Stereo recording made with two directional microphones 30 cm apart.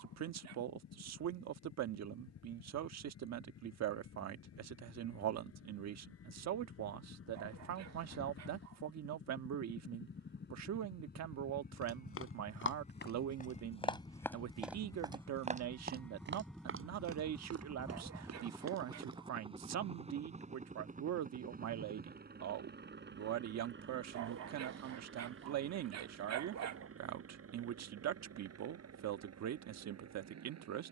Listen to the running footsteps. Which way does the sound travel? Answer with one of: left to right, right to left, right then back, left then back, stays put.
left to right.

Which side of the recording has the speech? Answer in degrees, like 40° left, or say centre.
60° right.